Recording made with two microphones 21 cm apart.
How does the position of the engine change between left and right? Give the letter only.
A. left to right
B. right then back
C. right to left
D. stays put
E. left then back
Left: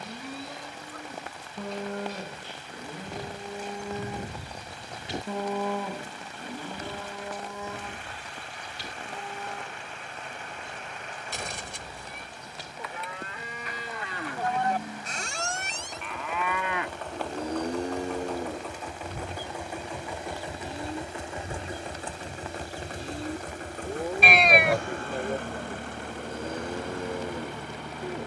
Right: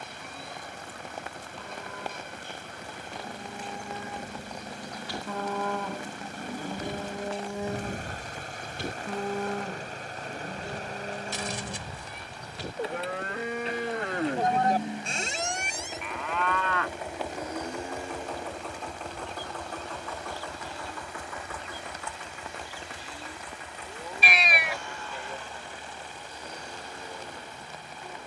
C.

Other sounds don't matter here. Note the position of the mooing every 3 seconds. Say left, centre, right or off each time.
left, left, right, right, right, centre, left, left, left, left.